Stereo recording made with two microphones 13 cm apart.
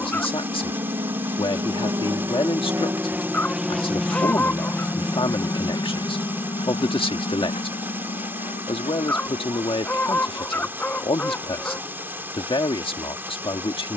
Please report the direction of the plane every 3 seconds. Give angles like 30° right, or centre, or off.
40° right, 10° left, 50° left, 60° left, 70° left.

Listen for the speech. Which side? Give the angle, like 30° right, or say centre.
40° left.